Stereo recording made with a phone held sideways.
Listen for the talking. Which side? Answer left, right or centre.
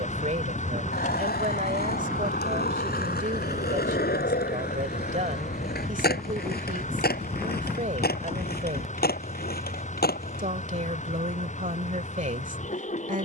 right.